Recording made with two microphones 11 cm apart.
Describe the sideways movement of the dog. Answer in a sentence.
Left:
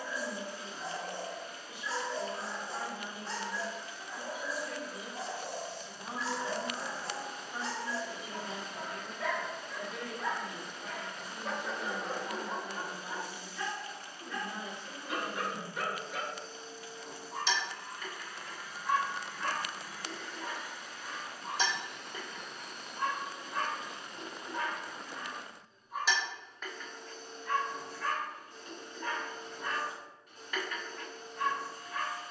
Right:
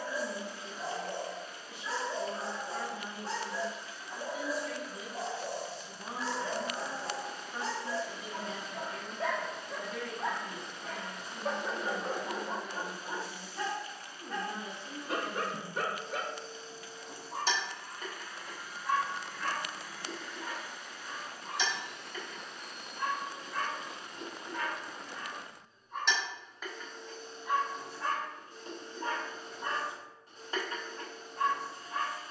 In this clip you hear the dog move from right to left and back again.